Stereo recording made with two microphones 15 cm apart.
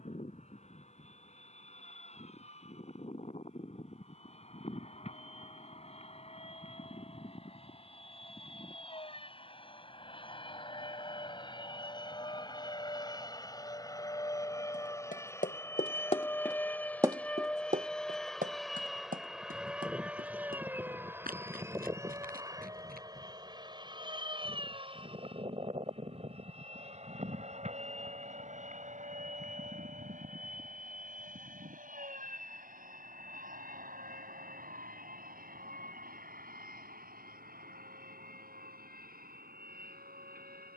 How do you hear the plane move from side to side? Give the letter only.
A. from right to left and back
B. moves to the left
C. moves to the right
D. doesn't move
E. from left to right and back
C.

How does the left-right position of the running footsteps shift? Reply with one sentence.
In this clip you hear the running footsteps go from the left side to the right.